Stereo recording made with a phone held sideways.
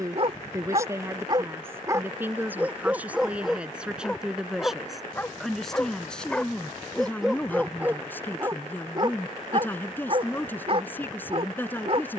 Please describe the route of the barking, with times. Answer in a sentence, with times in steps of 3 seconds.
In this clip you hear the barking on the right from 0 s, in the centre from 3 s and on the right from 9 s.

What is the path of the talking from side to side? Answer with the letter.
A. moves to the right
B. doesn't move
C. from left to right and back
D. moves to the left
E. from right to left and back
D.